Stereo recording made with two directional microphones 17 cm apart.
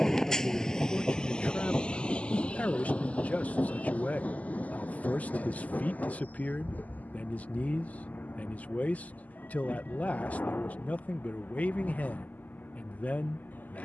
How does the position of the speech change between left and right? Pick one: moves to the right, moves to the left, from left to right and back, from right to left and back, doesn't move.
doesn't move.